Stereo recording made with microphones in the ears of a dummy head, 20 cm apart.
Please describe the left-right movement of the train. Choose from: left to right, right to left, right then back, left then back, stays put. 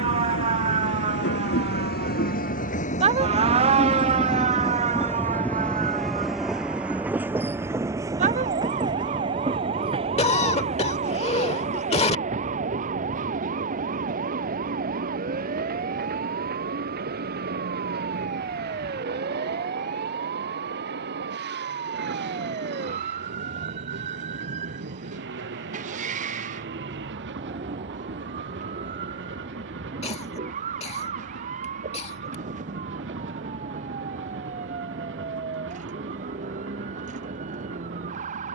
left to right.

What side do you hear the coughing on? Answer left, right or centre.
left.